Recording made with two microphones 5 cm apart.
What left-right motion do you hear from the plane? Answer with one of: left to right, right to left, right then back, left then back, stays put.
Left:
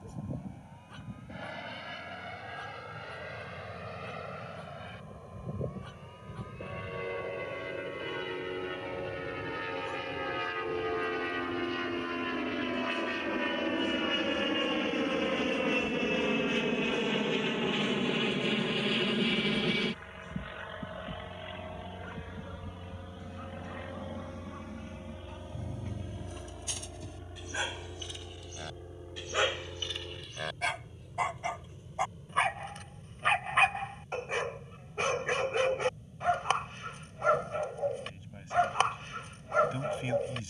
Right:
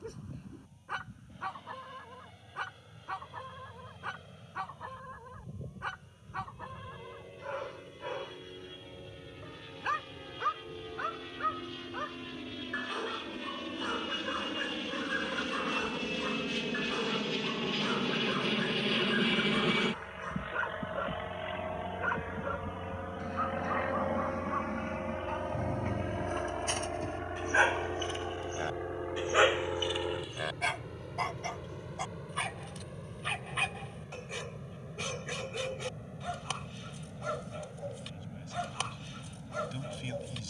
left to right.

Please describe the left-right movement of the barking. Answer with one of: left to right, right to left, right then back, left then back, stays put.
right to left.